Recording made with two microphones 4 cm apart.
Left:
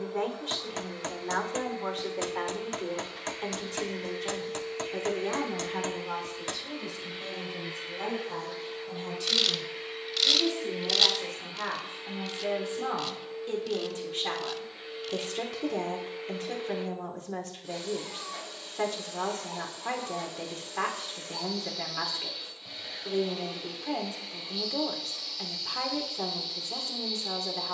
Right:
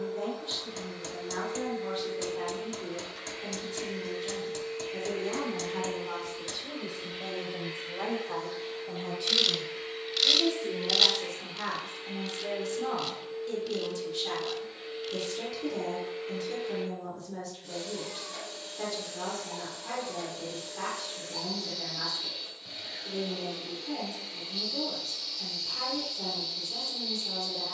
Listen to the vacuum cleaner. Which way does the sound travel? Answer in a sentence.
You can hear the vacuum cleaner stay in one place.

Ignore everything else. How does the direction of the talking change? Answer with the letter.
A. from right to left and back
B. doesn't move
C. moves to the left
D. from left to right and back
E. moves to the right
D.